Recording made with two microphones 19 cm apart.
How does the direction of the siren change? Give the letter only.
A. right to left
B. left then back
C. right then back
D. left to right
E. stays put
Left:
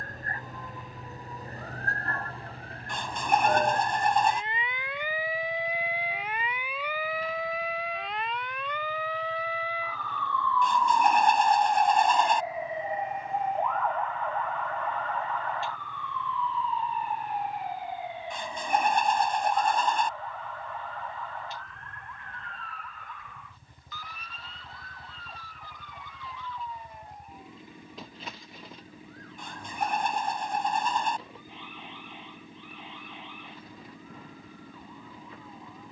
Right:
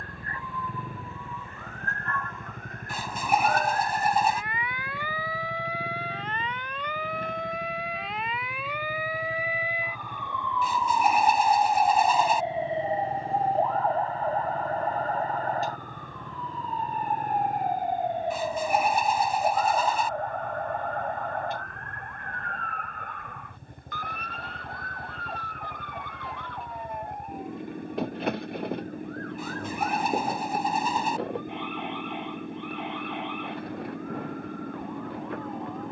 D.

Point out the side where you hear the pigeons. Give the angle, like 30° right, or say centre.
10° right.